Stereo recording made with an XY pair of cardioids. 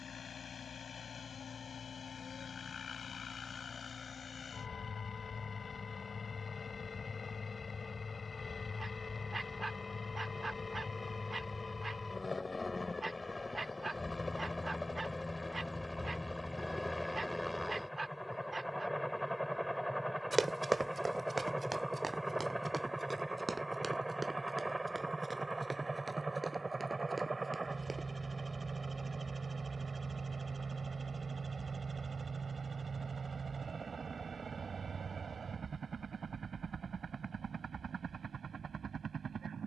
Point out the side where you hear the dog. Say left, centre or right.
right.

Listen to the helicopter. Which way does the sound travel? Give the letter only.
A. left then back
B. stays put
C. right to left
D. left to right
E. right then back
D.